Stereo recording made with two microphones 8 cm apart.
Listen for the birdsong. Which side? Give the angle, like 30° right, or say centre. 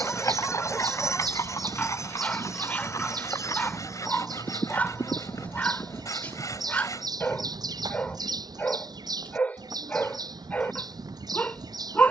60° right.